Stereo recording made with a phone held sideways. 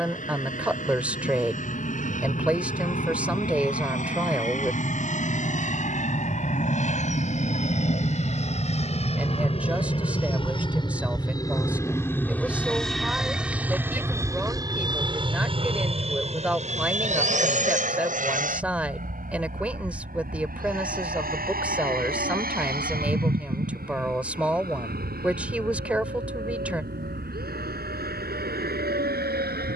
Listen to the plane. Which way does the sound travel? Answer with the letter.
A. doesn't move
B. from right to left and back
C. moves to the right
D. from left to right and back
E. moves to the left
C.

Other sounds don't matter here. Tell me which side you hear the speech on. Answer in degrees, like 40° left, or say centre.
10° right.